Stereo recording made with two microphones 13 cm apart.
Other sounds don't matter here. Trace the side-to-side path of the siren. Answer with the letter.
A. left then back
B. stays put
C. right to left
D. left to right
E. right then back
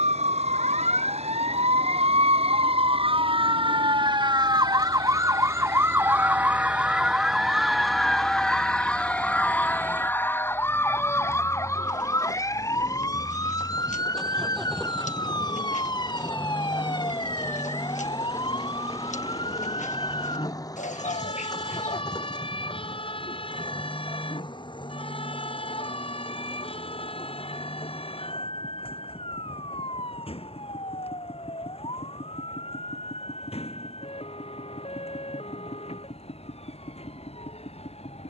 C.